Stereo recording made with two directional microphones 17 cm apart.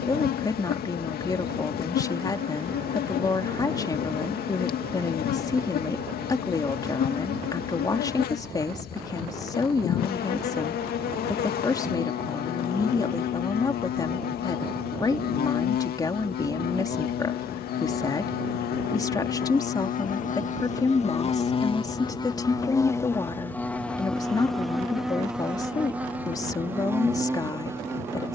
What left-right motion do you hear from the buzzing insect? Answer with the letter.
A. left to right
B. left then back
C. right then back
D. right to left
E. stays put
A.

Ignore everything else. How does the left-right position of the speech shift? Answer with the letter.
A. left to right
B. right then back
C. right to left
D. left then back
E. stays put
E.